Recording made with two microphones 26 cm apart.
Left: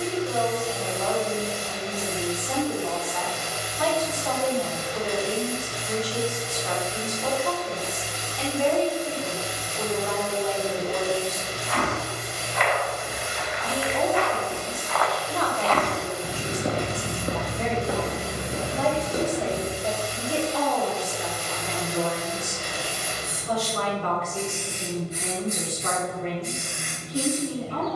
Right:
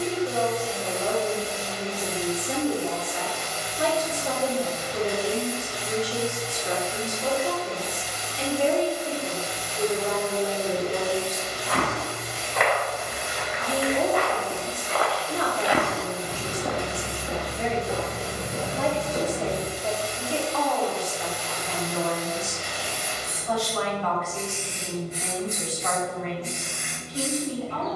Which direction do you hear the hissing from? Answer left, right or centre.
left.